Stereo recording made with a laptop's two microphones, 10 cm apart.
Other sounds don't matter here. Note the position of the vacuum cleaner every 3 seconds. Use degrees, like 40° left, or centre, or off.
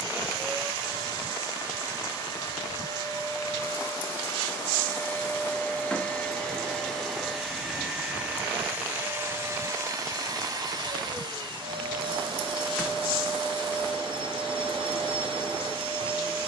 40° left, 30° left, centre, 40° right, 60° right, 60° right.